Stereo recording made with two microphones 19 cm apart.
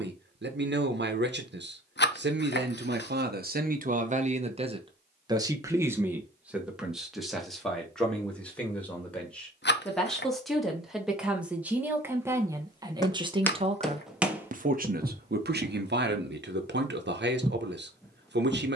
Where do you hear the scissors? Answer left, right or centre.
left.